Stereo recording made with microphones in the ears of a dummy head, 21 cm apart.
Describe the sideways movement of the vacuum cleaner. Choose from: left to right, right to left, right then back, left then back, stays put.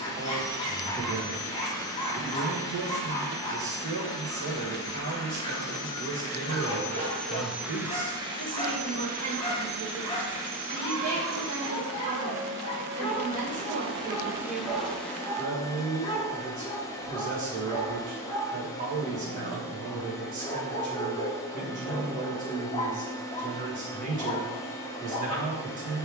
right then back.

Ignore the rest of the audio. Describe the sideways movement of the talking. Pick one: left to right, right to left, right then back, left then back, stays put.
stays put.